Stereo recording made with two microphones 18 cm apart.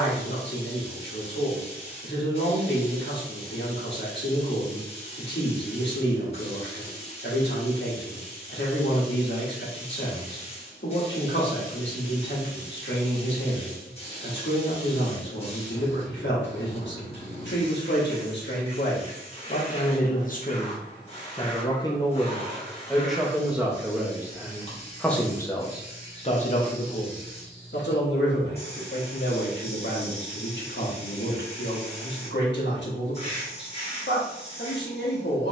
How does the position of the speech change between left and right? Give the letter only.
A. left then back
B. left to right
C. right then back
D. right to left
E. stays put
C.